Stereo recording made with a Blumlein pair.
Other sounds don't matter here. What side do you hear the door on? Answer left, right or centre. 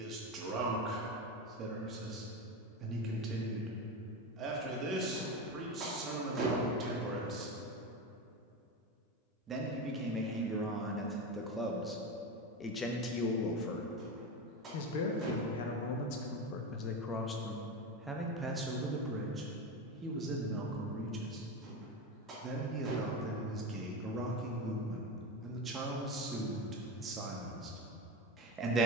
right.